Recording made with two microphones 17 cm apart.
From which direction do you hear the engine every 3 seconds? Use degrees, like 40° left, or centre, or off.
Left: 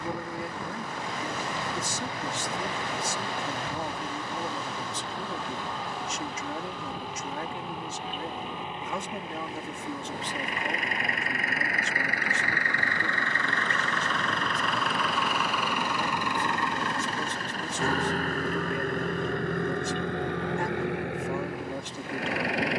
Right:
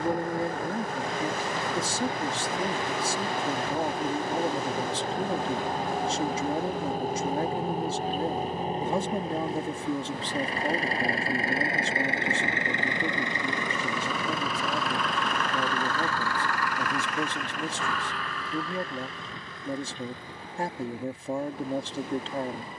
50° right, 50° right, 40° right, 30° right, 10° right, 20° left, 60° left, 80° left.